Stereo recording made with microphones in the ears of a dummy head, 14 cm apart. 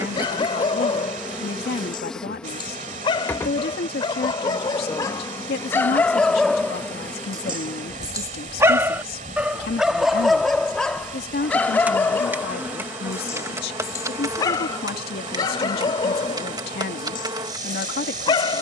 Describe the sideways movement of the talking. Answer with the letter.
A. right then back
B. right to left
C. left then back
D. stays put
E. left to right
D.